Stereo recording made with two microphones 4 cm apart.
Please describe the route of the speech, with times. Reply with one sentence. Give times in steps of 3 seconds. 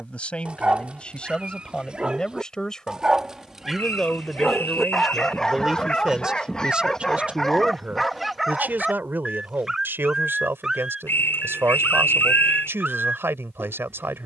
You can hear the speech on the left from 0 s, in the centre from 3 s and on the right from 6 s.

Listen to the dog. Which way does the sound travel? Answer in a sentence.
In this clip you hear the dog move from right to left and back again.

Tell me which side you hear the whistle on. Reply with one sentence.
You can hear the whistle on the left.